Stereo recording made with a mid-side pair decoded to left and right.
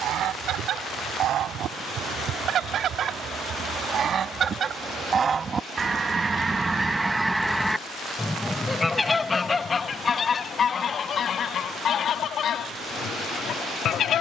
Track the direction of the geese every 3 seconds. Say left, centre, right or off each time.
right, right, centre, left, left.